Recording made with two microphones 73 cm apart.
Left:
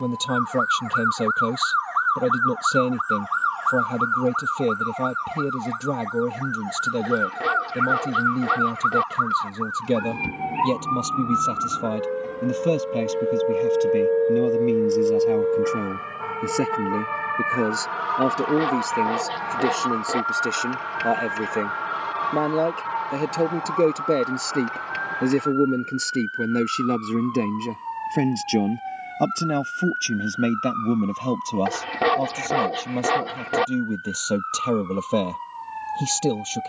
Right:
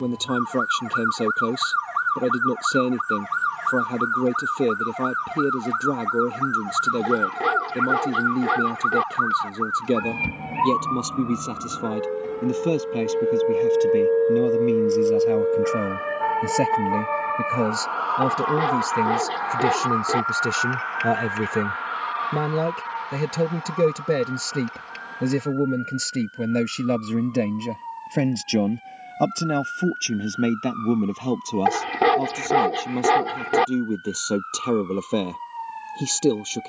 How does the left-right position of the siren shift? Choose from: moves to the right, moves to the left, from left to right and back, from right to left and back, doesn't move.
moves to the left.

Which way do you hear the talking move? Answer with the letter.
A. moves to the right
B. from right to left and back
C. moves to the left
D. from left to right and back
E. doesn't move
D.